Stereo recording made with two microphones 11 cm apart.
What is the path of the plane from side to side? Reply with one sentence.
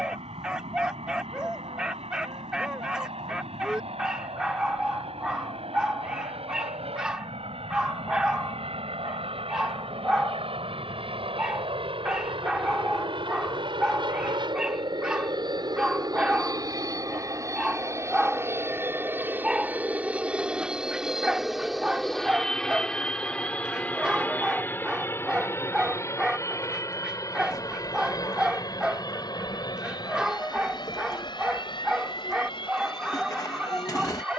You can hear the plane move to the left.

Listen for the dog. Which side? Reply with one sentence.
In this clip you hear the dog in the centre.